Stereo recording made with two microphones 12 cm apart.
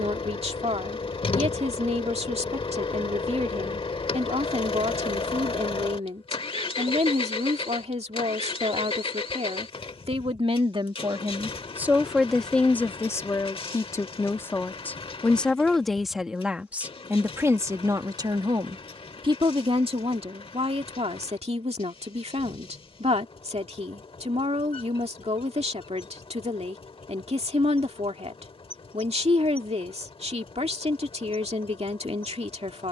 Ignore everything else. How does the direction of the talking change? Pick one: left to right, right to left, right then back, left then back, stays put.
left then back.